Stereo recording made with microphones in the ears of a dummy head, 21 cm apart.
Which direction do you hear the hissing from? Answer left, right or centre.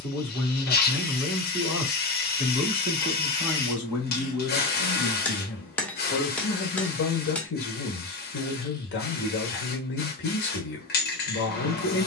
left.